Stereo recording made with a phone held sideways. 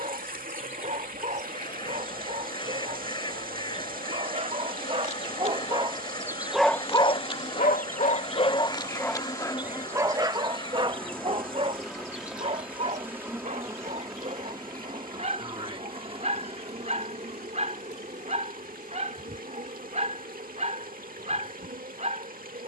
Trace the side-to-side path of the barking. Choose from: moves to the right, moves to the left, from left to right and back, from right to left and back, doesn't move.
from right to left and back.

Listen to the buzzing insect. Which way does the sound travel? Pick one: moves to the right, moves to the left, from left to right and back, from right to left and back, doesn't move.
moves to the right.